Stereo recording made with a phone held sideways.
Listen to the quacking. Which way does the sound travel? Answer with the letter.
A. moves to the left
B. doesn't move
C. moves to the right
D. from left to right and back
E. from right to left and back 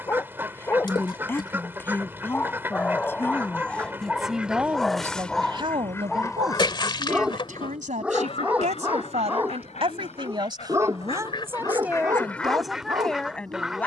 E.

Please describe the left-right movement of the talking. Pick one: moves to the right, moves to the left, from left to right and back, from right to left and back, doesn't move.
from left to right and back.